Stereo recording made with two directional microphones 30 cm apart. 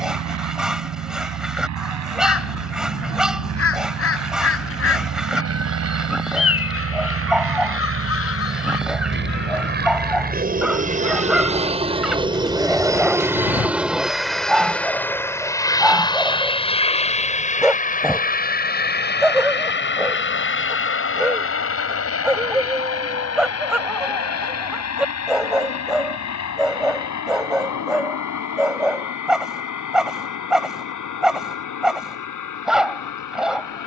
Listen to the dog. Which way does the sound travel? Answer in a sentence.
You can hear the dog stay put.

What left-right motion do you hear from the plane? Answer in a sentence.
In this clip you hear the plane move from right to left.